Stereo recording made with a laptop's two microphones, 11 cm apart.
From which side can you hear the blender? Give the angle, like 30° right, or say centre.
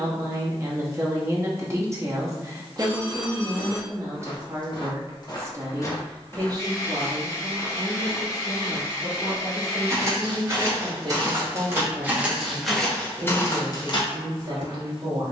30° left.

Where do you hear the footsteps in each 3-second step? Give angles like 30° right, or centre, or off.
off, 50° left, centre, 30° right, 20° left.